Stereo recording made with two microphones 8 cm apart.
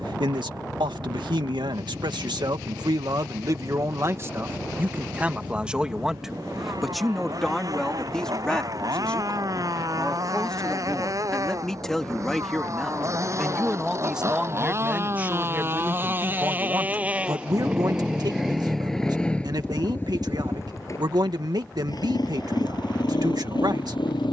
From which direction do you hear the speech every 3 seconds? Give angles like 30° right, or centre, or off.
80° right, 30° right, centre, 10° left, 10° right, 40° right, 60° right, 60° right.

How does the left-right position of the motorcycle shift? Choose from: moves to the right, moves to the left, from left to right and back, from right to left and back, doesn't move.
moves to the left.